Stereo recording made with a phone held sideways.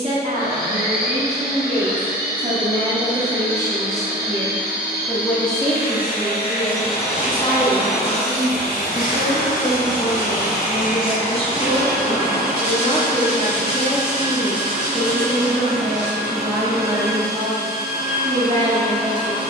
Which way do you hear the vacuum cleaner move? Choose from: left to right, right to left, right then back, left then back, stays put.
stays put.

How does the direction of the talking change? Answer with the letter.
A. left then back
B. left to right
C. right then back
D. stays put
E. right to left
A.